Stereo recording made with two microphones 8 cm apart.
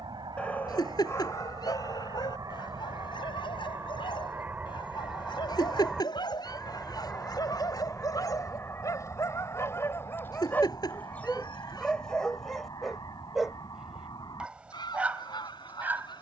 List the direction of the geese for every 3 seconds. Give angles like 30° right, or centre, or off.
50° right, 20° right, 20° left, 40° left, 50° left, 60° left.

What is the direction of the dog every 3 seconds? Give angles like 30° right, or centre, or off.
40° left, 70° left, 50° left, 20° left, centre, 20° right.